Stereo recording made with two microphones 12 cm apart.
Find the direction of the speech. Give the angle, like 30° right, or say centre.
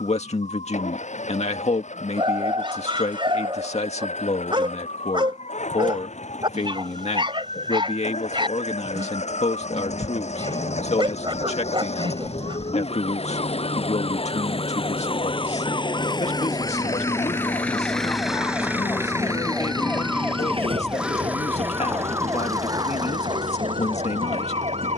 60° left.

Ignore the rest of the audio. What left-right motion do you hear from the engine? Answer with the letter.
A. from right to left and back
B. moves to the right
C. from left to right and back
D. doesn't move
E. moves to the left
B.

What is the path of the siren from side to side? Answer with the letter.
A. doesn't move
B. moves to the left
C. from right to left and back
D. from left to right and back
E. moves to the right
E.